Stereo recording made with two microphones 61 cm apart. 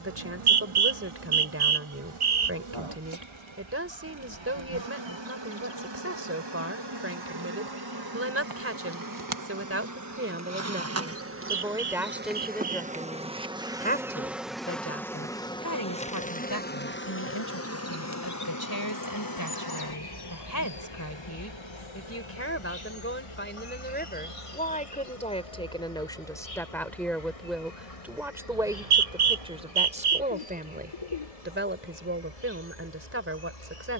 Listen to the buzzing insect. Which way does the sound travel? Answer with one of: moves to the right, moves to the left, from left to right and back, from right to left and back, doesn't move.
moves to the left.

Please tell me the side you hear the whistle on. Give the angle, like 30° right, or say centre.
80° right.